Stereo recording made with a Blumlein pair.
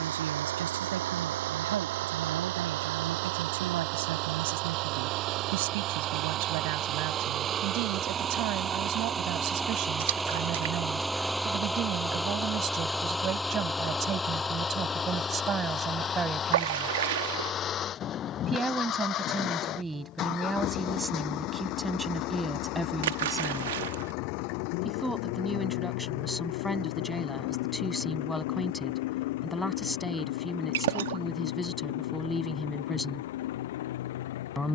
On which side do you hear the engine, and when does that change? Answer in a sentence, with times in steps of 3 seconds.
You can hear the engine on the right from 0 s, in the centre from 9 s and on the left from 15 s.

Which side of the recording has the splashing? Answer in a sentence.
In this clip you hear the splashing on the right.